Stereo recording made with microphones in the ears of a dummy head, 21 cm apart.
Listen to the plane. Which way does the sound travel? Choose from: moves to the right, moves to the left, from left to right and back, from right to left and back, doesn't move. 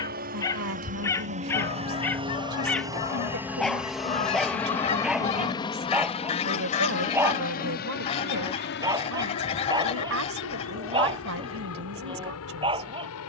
moves to the left.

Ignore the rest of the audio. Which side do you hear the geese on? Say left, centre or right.
left.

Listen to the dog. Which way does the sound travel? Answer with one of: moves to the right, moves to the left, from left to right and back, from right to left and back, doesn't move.
moves to the right.